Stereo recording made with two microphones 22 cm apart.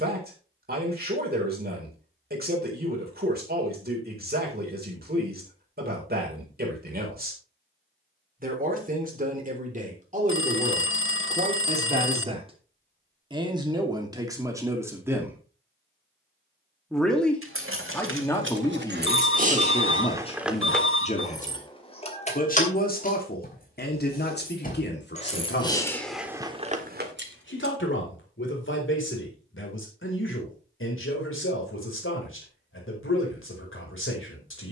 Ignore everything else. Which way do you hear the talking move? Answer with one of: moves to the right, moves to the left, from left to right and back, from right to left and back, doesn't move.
moves to the left.